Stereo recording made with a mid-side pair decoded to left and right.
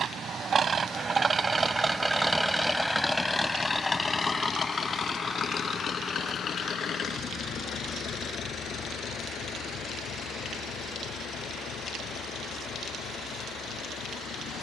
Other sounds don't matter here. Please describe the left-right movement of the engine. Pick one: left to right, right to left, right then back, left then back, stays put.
right to left.